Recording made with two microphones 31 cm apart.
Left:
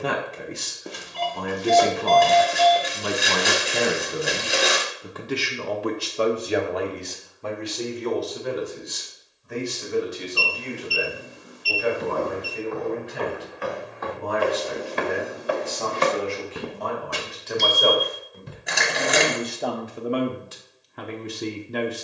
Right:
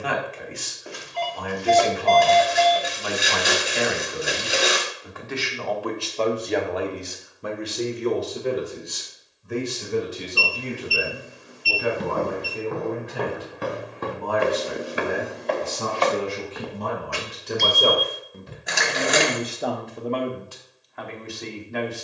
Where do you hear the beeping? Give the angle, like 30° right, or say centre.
50° left.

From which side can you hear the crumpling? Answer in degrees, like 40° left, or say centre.
centre.